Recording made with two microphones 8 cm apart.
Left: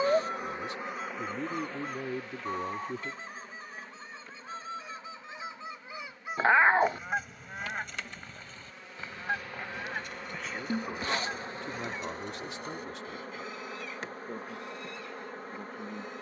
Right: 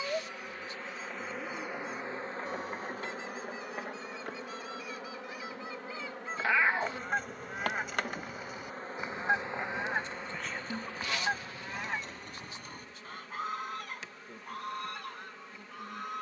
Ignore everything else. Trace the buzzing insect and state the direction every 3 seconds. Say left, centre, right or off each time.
centre, right, right, centre, left, left.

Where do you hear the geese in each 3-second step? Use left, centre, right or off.
left, left, centre, right, right, right.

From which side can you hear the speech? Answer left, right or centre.
left.